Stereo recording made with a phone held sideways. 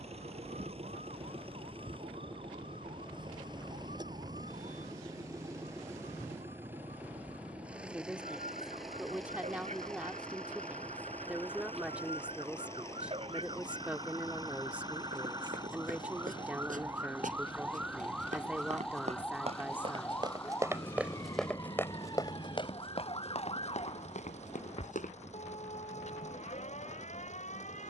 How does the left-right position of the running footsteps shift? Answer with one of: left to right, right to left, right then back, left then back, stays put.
right to left.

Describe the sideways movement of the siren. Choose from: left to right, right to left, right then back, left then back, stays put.
right to left.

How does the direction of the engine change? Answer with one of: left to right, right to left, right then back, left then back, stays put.
right to left.